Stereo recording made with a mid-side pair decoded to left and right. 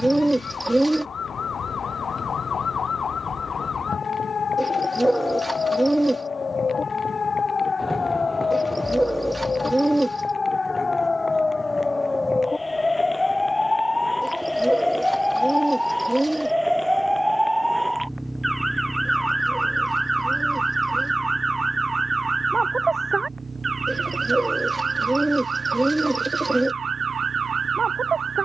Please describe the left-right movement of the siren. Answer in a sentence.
In this clip you hear the siren travel towards the right.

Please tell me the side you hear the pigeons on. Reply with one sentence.
You can hear the pigeons in the centre.